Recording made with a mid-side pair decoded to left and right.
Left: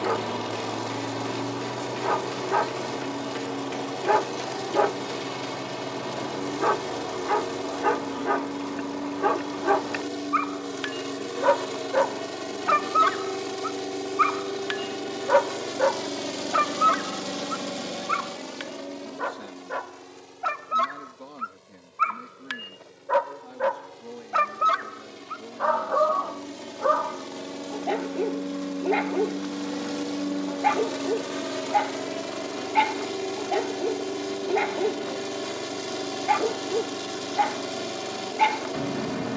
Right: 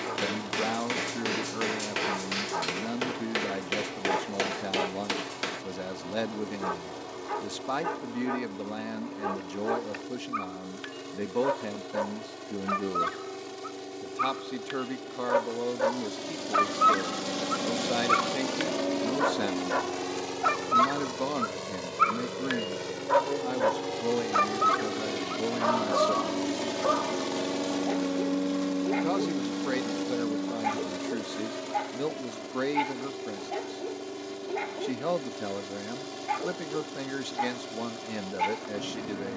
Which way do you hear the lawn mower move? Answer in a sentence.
In this clip you hear the lawn mower move from left to right and back again.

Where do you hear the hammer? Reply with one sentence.
In this clip you hear the hammer on the right.